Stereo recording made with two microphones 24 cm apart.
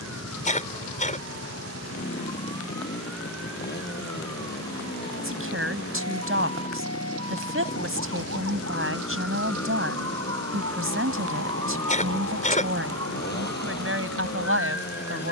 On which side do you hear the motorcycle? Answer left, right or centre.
left.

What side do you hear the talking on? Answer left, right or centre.
right.